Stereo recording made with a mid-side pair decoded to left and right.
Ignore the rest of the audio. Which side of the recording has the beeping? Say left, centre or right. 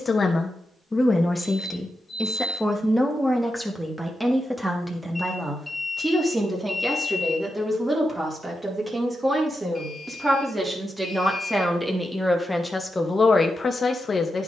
left.